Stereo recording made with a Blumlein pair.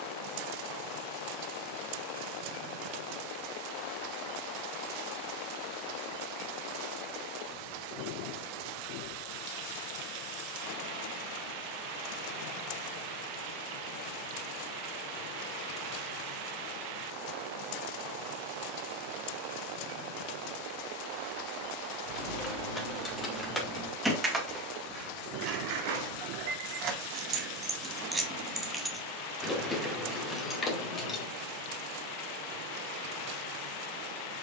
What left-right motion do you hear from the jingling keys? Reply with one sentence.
In this clip you hear the jingling keys move from left to right and back again.